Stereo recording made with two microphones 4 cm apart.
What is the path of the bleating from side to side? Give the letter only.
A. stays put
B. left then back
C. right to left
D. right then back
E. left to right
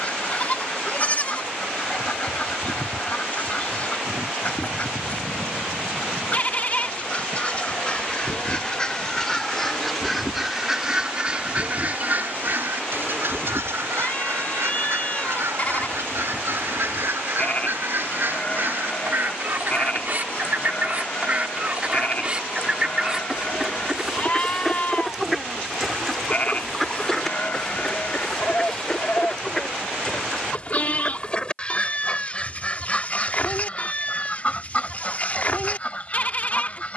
A.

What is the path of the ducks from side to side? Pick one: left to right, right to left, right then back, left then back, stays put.
right then back.